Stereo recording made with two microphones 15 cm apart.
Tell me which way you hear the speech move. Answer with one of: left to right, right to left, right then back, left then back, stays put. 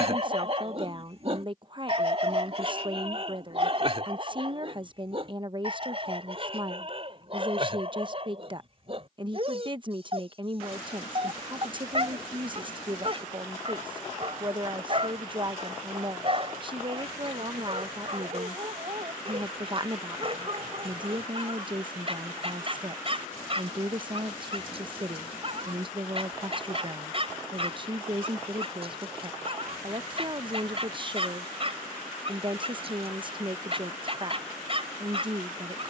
stays put.